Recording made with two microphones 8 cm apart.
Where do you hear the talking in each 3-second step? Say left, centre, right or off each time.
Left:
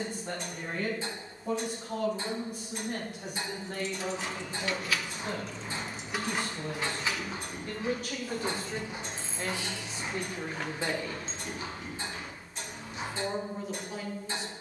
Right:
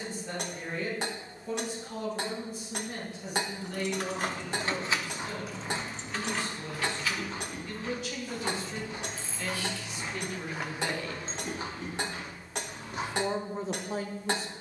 left, left, left, left, right.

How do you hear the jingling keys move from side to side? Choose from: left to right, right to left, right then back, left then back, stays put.
left then back.